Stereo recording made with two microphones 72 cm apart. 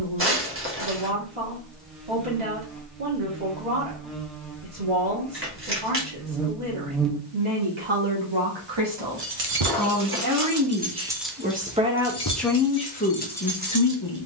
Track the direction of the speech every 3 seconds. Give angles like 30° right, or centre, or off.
40° right, 40° right, 40° right, 20° right, 10° left.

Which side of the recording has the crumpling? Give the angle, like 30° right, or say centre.
20° right.